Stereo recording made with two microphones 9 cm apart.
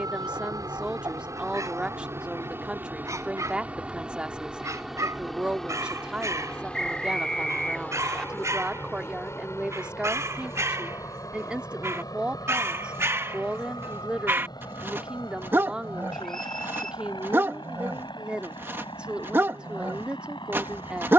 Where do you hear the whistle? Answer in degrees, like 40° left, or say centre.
centre.